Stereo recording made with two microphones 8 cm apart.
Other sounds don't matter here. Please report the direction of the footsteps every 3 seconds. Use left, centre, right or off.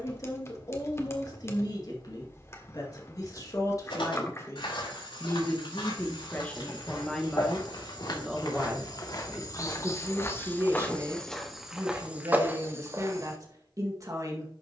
off, left, left, left, right.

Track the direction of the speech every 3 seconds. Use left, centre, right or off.
left, left, centre, right, right.